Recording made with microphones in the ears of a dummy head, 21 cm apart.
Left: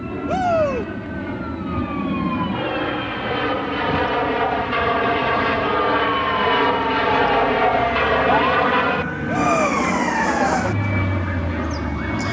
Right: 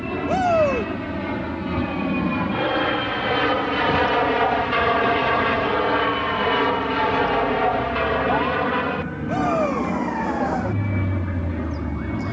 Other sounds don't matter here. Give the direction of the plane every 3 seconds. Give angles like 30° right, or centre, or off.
30° right, 10° right, 20° left, 40° left.